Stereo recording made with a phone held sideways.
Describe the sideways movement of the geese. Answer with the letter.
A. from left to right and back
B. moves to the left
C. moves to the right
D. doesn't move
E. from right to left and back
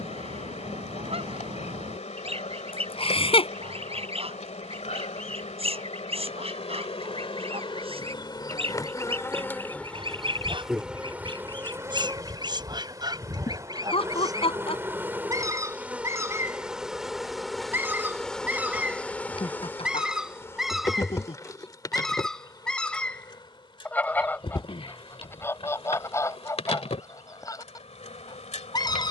B.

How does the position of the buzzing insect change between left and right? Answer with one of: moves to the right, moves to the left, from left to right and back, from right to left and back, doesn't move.
from left to right and back.